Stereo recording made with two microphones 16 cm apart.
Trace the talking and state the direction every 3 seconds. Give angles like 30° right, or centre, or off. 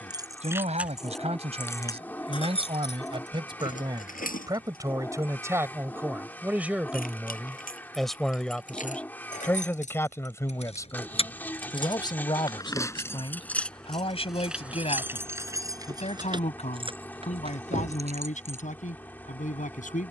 40° right, 20° right, centre, 20° left, 30° left, 50° left, 50° left.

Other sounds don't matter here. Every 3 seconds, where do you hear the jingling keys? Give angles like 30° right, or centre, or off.
10° left, 60° left, 60° left, 40° left, 10° left, 30° right, 40° right.